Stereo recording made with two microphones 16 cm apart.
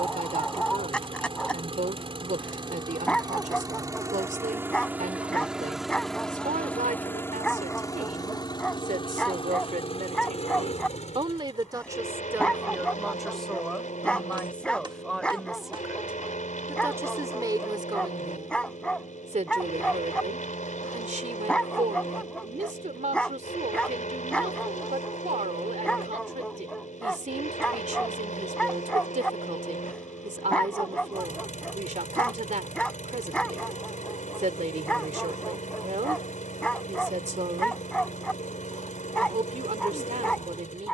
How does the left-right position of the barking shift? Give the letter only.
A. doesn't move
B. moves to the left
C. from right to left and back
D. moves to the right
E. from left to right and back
A.